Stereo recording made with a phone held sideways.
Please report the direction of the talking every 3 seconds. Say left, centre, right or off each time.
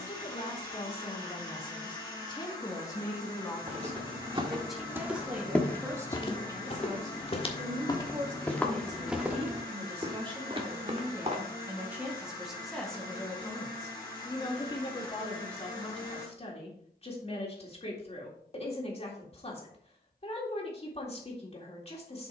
left, centre, right, right, centre, left, left, left.